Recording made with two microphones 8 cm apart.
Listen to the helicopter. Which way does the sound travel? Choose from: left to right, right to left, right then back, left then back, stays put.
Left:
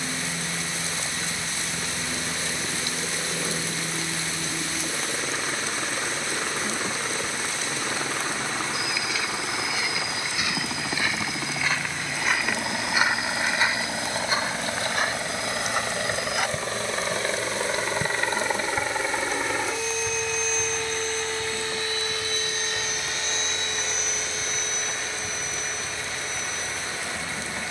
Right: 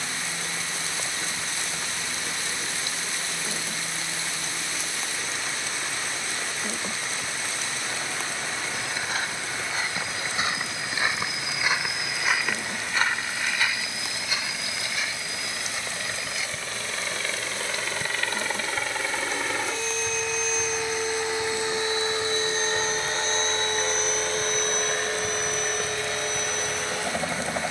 left to right.